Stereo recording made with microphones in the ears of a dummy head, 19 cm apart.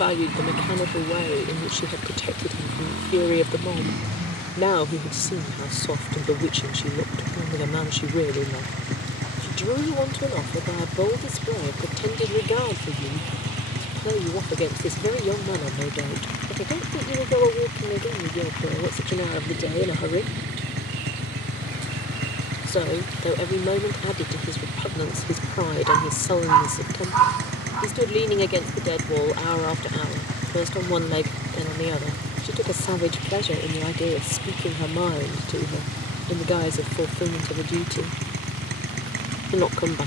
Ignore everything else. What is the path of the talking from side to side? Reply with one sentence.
You can hear the talking stay put.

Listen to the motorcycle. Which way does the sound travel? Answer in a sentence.
In this clip you hear the motorcycle stay in one place.